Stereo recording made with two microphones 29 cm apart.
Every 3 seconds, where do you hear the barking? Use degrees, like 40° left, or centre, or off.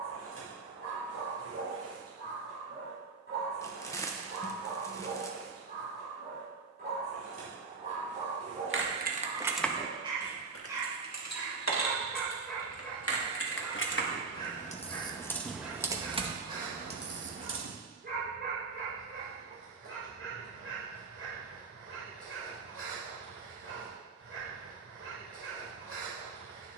50° right, 40° right, 30° right, 10° right, 10° left, 10° right, 50° right, 50° right, 50° right.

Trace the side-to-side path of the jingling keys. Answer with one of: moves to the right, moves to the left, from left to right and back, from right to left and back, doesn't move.
from right to left and back.